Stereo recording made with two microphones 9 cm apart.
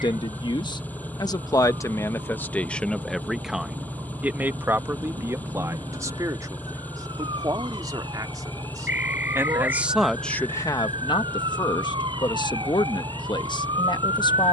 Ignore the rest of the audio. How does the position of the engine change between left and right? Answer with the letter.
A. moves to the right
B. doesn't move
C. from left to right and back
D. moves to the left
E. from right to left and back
B.